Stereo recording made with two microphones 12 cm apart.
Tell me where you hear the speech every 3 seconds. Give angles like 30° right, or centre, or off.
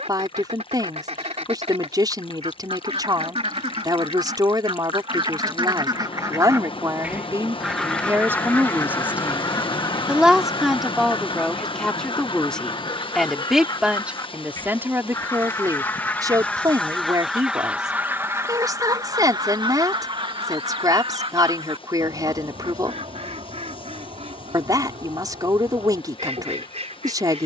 40° right, 40° right, 30° right, centre, centre, 30° right, 40° right, 40° right, 40° right.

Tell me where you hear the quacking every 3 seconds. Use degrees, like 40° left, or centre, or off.
80° right, 60° right, centre, 40° left, 40° left, 10° left, 40° right, 70° right, 80° right.